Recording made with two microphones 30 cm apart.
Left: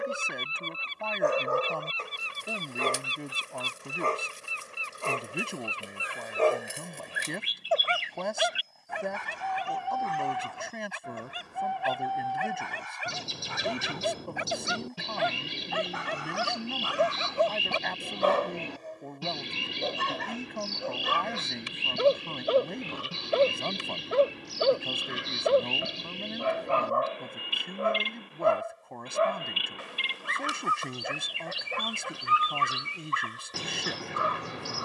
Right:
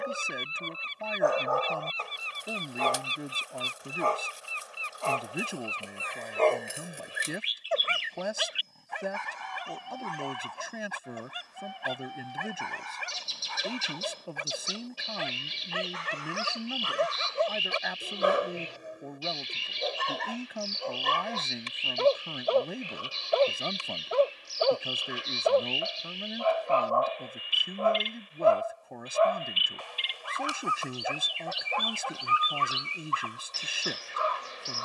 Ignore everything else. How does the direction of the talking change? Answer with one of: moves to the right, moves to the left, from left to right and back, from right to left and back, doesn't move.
doesn't move.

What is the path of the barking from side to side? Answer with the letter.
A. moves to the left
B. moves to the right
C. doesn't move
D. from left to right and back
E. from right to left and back
D.